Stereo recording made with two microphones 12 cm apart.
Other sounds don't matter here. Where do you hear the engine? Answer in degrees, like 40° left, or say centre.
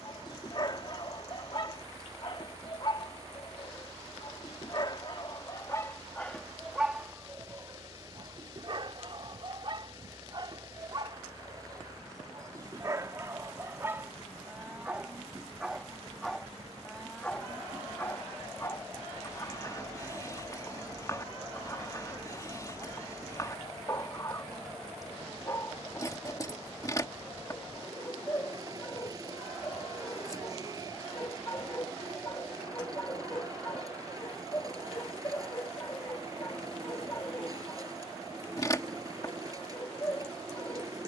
30° right.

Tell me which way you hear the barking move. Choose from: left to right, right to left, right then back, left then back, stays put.
right then back.